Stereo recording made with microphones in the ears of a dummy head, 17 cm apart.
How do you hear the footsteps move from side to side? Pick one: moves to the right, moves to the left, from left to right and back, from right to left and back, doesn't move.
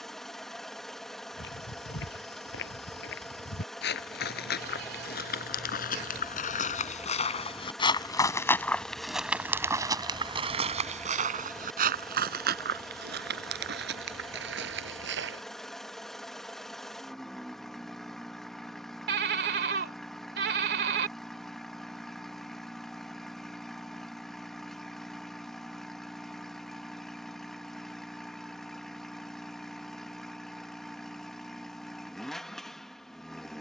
moves to the right.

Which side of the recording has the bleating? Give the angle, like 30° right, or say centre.
60° right.